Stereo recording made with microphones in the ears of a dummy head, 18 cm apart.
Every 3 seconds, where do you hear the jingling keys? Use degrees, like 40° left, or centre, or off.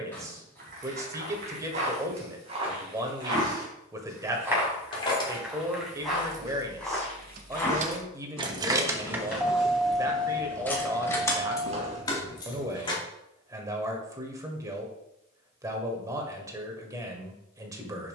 off, 20° left, 30° right, 10° left, 20° left, off.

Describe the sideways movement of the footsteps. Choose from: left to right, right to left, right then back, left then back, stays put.
left then back.